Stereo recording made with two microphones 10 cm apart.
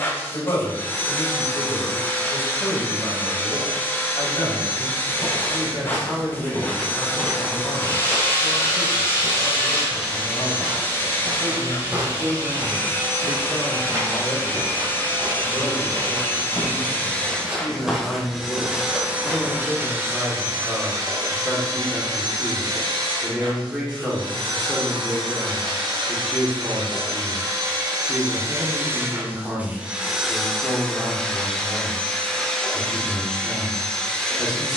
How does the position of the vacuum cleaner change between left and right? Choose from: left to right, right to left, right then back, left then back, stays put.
right then back.